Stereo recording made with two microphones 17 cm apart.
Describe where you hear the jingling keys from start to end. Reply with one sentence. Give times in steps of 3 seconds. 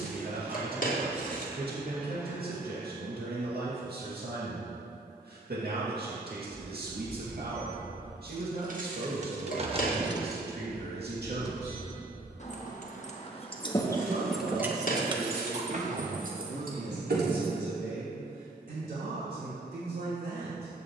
In this clip you hear the jingling keys not at all from 0 s, on the right from 6 s, in the centre from 9 s, on the left from 12 s, on the right from 15 s and not at all from 18 s.